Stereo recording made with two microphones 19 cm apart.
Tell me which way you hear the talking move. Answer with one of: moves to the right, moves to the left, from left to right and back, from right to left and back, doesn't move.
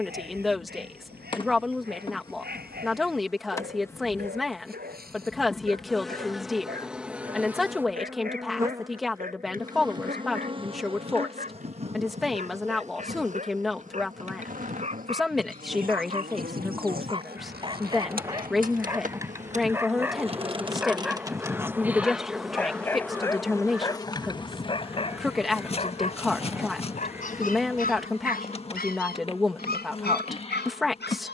doesn't move.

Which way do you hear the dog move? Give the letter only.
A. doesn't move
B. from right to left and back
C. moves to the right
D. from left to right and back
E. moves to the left
E.